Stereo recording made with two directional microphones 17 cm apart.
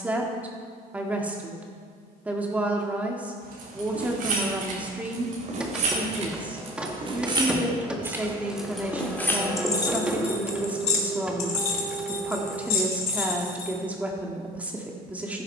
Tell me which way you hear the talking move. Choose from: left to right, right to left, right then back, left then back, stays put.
stays put.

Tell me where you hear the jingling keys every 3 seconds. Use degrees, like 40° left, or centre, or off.
off, 50° right, 20° right, 30° left, 60° left.